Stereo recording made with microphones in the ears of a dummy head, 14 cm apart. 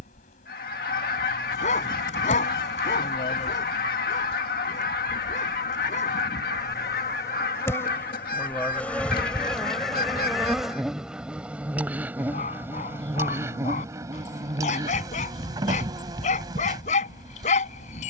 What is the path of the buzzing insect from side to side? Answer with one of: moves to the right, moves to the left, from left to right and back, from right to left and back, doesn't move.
moves to the right.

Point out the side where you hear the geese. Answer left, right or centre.
left.